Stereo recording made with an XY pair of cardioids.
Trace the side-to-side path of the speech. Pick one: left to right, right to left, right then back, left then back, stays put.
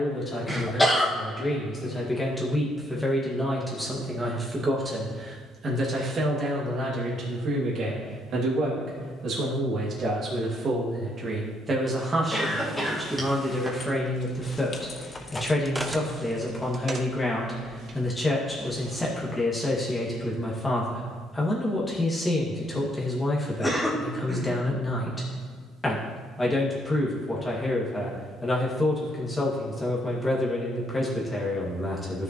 right then back.